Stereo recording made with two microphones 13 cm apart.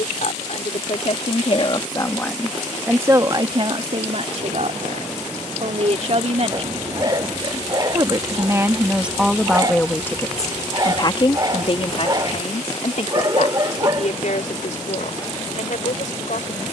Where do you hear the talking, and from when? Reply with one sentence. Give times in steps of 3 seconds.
You can hear the talking on the left from 0 s, on the right from 3 s and on the left from 9 s.